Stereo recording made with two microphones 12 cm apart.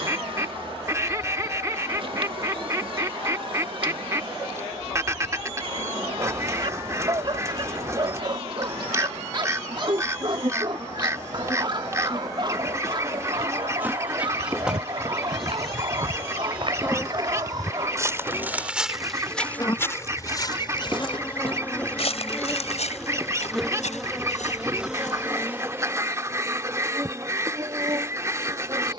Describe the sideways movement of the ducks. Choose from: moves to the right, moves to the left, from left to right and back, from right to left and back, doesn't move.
doesn't move.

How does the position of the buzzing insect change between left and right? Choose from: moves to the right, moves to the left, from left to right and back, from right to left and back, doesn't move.
from right to left and back.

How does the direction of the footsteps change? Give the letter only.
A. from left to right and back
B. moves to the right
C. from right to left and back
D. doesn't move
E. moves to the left
E.